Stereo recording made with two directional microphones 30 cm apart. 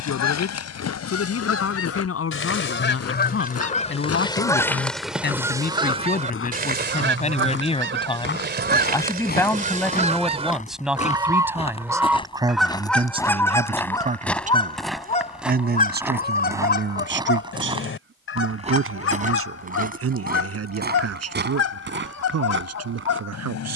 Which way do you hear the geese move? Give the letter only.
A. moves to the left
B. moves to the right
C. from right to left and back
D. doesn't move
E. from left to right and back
E.